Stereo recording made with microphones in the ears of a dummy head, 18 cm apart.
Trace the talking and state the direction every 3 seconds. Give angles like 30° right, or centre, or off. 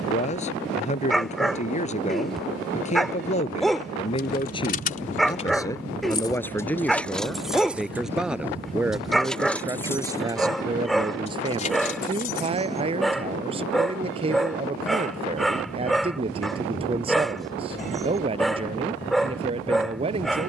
30° left, 30° left, centre, 20° right, 30° right, 30° right, 30° right.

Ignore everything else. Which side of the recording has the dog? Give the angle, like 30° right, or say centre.
centre.